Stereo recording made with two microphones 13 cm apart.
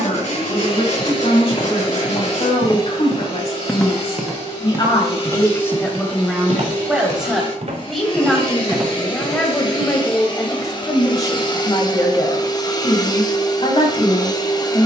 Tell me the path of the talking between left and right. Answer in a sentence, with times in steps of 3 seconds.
In this clip you hear the talking on the left from 0 s, in the centre from 6 s and on the left from 9 s.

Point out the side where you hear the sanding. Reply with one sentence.
In this clip you hear the sanding on the left.